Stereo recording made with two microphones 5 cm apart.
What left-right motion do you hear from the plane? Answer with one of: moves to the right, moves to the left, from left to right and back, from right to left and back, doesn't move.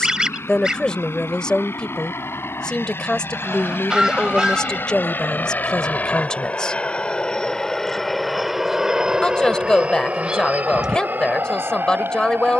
moves to the right.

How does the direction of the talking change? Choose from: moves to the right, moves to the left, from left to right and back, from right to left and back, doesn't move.
doesn't move.